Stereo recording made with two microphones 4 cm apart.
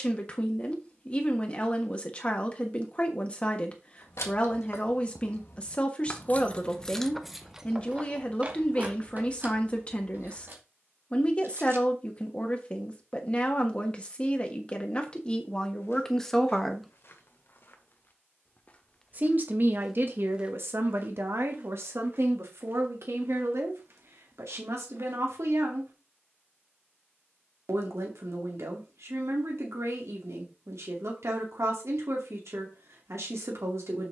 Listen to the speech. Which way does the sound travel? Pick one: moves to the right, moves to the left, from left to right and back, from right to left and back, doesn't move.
moves to the right.